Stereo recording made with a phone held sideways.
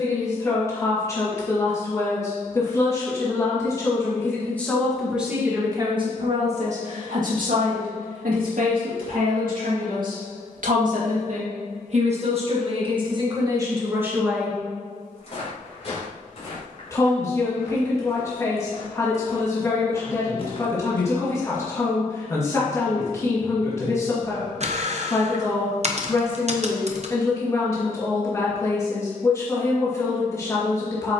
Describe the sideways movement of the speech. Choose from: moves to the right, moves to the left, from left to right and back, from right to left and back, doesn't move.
from left to right and back.